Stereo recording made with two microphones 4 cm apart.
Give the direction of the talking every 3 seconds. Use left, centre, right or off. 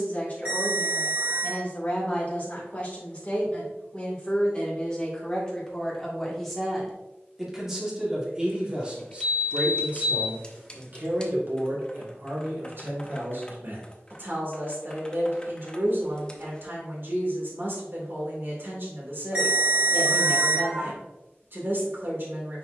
left, left, centre, right, right, right, right, right.